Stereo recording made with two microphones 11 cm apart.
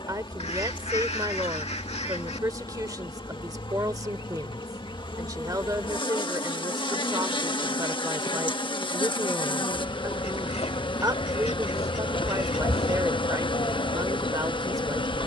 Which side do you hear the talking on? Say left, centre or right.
right.